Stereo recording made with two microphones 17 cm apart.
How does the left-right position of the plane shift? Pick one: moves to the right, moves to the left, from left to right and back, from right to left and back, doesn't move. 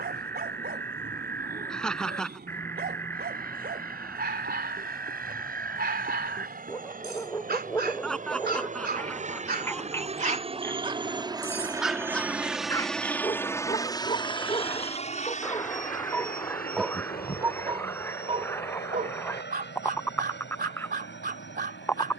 moves to the left.